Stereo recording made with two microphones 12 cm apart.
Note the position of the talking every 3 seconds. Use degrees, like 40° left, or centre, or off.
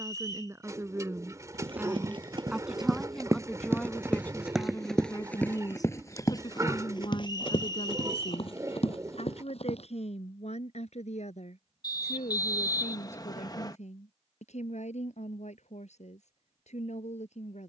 20° right, 20° left, 50° left, 70° left, 80° left, 80° left.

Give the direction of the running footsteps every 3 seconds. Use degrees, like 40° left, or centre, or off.
40° right, centre, 40° left, 60° left, off, off.